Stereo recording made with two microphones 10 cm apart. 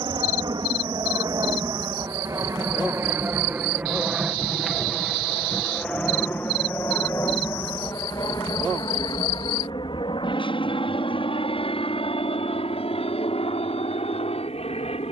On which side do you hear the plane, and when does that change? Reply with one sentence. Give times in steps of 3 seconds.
In this clip you hear the plane on the right from 0 s, in the centre from 3 s and on the left from 6 s.